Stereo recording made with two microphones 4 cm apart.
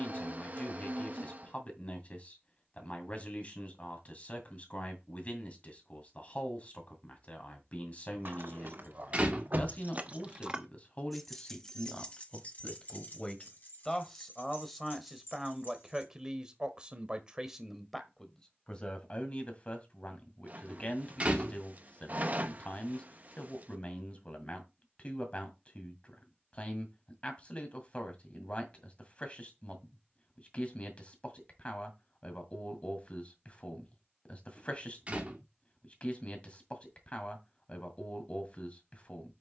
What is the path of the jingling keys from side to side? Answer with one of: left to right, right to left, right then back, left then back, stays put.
right to left.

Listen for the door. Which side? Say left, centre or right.
right.